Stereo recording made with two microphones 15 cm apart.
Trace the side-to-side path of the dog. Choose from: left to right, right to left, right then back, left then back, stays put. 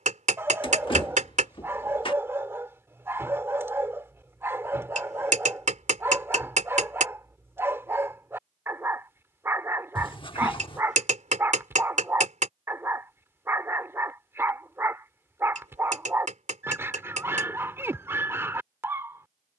stays put.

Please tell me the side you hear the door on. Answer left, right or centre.
left.